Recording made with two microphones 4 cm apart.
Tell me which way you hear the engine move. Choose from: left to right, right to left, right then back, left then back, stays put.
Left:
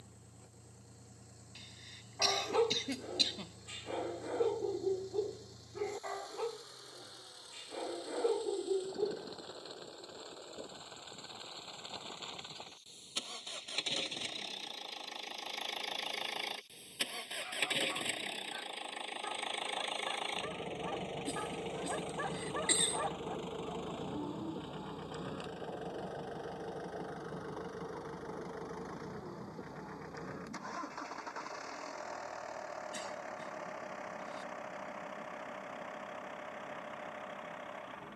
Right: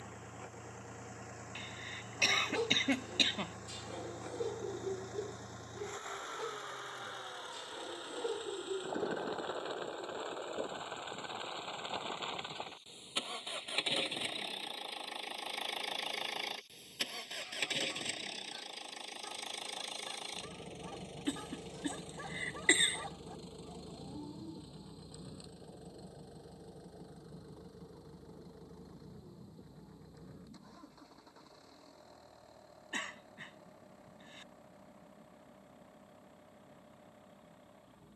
right to left.